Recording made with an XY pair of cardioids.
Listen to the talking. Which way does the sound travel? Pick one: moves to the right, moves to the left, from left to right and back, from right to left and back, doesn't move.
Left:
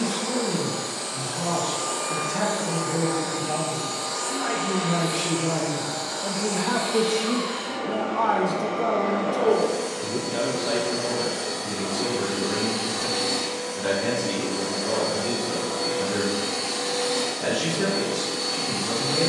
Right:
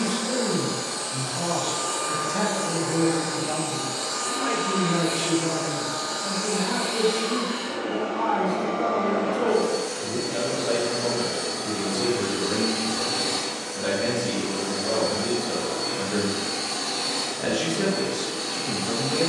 from right to left and back.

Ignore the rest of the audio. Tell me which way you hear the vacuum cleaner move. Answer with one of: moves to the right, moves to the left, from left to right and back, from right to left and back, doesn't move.
moves to the left.